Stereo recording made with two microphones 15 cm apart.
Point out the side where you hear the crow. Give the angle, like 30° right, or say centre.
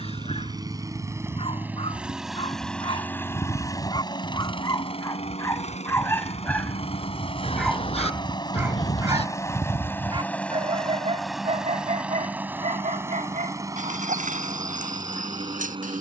50° left.